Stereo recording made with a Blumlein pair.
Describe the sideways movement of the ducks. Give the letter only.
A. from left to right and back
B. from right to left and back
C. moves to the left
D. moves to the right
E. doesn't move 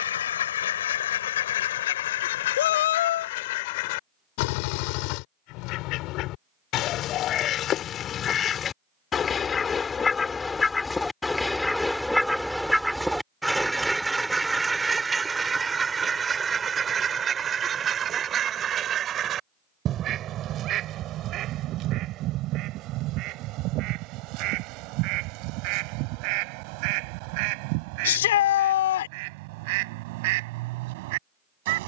D.